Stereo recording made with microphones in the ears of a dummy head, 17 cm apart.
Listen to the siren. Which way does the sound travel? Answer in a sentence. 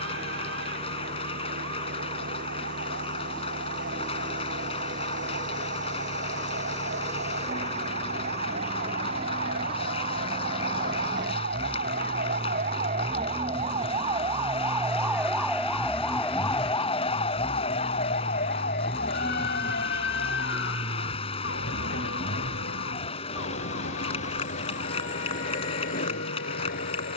In this clip you hear the siren go from the right side to the left.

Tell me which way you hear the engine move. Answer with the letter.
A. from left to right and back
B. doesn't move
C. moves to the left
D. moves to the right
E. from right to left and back
C.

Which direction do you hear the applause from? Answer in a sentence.
You can hear the applause on the left.